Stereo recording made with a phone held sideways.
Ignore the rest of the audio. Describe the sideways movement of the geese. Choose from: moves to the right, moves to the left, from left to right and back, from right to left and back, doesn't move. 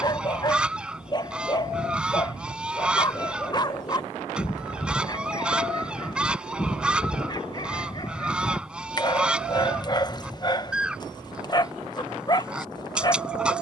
doesn't move.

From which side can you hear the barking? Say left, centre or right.
left.